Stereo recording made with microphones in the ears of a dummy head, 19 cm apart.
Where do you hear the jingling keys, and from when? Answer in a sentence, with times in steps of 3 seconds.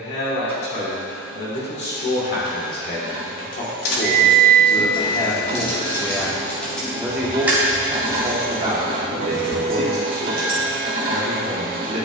You can hear the jingling keys not at all from 0 s, on the left from 3 s, in the centre from 6 s and on the right from 9 s.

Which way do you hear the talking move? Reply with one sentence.
In this clip you hear the talking move to the right.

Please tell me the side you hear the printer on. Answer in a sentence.
You can hear the printer on the right.